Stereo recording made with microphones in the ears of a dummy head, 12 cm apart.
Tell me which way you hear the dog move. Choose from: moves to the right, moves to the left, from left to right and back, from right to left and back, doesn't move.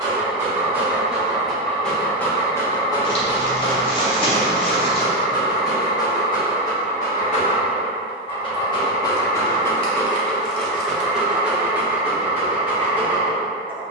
from right to left and back.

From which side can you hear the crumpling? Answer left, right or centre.
left.